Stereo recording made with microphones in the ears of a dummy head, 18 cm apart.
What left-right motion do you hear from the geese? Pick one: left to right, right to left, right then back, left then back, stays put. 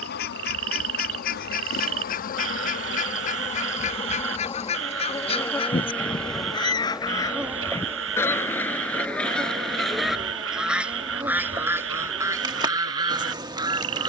left to right.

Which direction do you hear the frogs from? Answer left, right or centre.
right.